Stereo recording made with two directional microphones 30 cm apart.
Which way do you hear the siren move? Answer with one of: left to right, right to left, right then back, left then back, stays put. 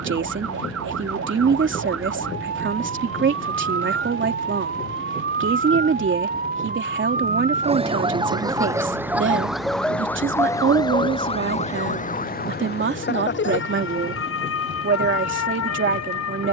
right to left.